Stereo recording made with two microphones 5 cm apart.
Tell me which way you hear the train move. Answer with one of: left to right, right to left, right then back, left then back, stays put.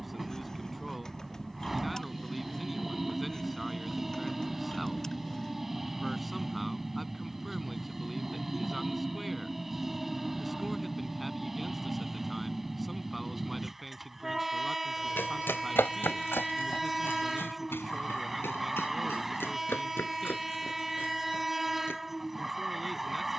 stays put.